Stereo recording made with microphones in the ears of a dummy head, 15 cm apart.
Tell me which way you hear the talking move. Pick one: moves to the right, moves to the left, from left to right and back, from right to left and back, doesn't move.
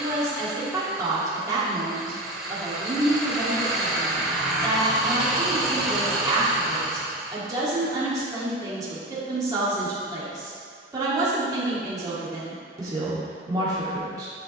doesn't move.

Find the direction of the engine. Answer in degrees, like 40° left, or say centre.
centre.